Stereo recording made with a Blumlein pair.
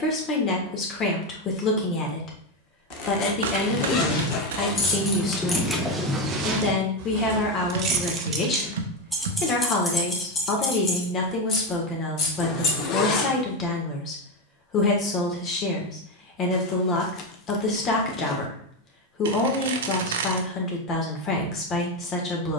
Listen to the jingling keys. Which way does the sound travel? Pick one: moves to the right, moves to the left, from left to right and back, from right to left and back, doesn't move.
from left to right and back.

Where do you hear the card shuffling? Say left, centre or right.
right.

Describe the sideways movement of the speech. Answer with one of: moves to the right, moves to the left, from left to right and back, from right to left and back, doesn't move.
doesn't move.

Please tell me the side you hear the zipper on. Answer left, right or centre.
left.